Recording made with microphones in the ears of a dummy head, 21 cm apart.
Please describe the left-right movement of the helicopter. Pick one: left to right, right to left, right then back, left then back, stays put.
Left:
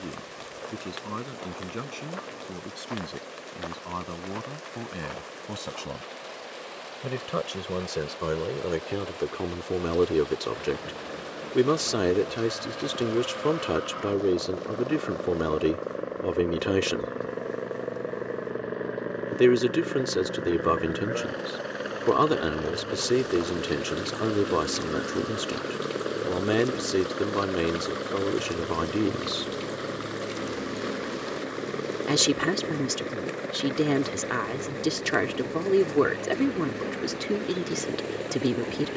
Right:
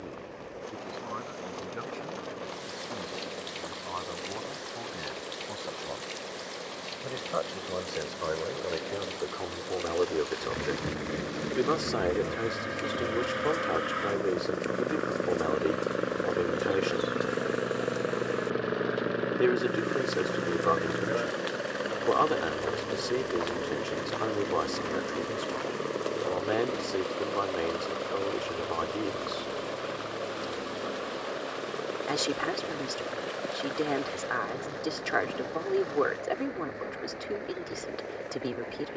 right to left.